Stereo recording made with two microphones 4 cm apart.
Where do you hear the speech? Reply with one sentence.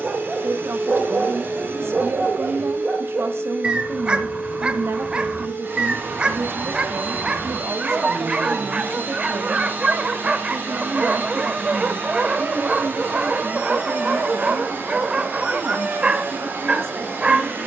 You can hear the speech on the right.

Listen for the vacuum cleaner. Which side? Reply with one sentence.
In this clip you hear the vacuum cleaner on the right.